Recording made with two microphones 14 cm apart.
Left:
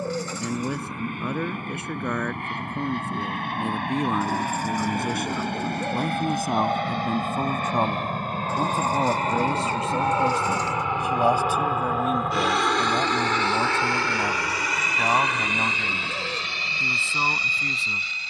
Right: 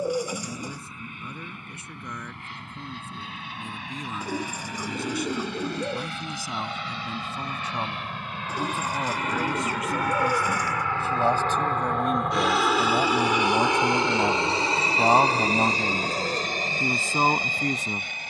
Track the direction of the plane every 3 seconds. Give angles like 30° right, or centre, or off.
70° left, 70° left, 50° left, 20° left, 10° right, 40° right.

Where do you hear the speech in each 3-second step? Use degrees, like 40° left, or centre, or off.
70° left, 60° left, 50° left, 20° left, 10° right, 40° right.